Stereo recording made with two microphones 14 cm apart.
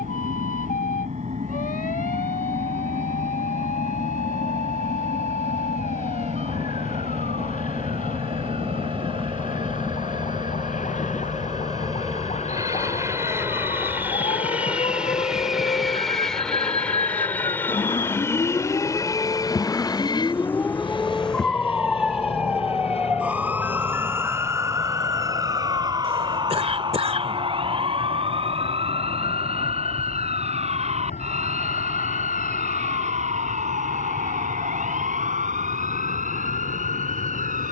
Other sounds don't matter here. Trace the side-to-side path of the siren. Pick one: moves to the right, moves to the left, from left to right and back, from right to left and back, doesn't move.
moves to the right.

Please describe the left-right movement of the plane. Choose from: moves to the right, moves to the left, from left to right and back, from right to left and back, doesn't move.
moves to the left.